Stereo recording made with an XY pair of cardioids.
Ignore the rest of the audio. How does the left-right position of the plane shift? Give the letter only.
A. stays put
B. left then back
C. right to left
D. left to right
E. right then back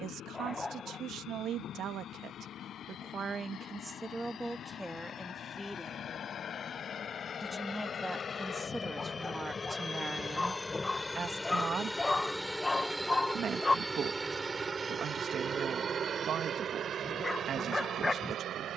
D.